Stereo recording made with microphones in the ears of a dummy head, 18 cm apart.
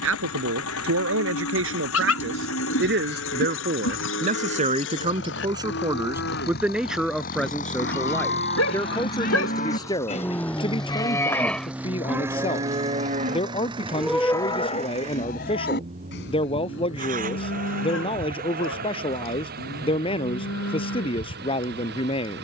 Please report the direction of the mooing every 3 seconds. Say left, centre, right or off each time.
left, left, left, left, centre, left, left, left.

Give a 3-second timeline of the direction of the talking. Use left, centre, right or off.
right, right, centre, left, left, left, left, left.